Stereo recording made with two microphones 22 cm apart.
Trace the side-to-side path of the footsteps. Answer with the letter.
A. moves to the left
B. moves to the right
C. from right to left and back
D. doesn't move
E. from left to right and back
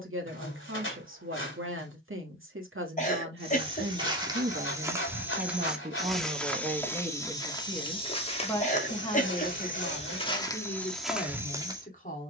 C.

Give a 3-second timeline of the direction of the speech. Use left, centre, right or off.
right, right, centre, left.